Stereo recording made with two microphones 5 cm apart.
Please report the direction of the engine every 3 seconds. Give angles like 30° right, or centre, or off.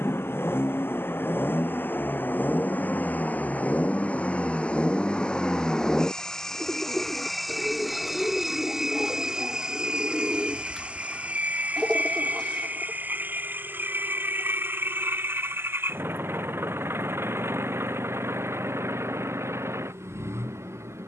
40° left, 20° left, centre, 20° right, 30° right, 40° right, 50° right.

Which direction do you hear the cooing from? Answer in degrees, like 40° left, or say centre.
10° left.